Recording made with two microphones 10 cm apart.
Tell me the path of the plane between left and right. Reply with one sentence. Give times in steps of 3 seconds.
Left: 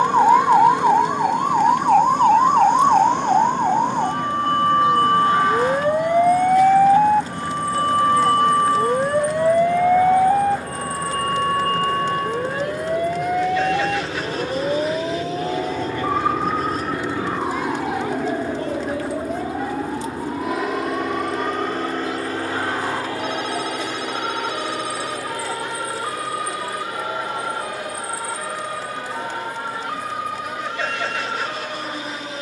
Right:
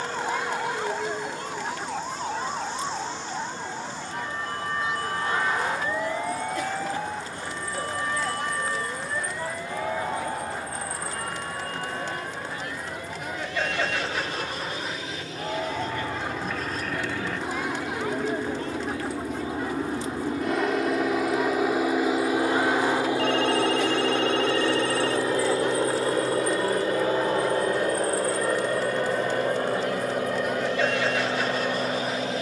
You can hear the plane on the left from 0 s, in the centre from 18 s and on the right from 24 s.